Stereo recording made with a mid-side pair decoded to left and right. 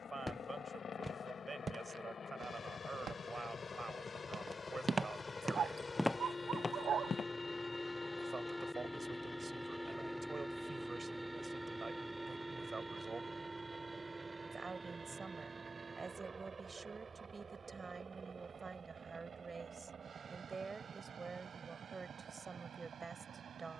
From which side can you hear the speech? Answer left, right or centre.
right.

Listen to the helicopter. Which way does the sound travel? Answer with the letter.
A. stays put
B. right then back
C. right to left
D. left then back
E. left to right
E.